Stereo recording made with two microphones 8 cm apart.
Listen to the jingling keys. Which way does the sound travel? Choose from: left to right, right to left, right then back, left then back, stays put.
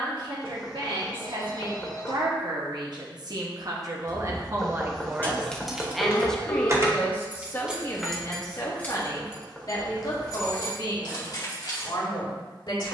right then back.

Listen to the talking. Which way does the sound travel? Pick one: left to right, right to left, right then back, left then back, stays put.
right to left.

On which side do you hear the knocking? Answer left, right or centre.
centre.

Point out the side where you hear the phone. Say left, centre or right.
left.